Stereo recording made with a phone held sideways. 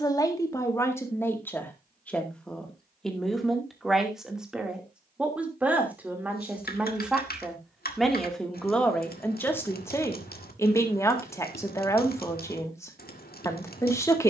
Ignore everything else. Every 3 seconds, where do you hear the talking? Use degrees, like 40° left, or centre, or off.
10° left, centre, centre, 20° left, 20° left.